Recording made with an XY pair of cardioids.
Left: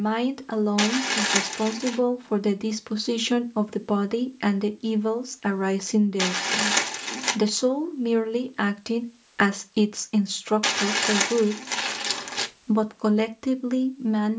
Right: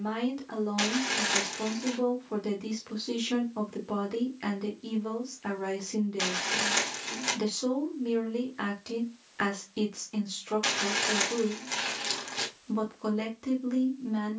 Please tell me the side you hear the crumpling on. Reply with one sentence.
You can hear the crumpling on the left.